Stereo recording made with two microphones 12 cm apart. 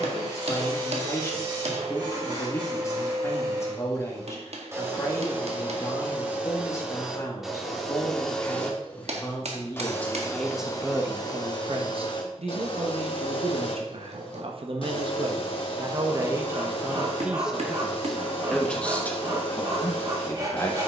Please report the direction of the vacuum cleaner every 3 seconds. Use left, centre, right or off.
right, right, centre, left, left, left, left.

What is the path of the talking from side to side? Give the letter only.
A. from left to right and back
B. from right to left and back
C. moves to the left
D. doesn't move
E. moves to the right
A.